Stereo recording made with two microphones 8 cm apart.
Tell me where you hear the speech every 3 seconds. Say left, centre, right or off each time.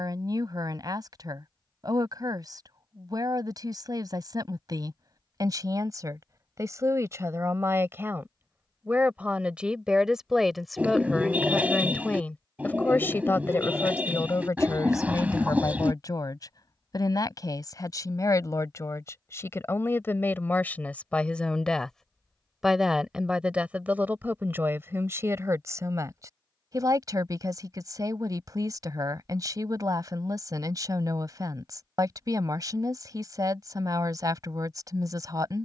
right, right, right, centre, left, left, left, centre, right, right, right, right.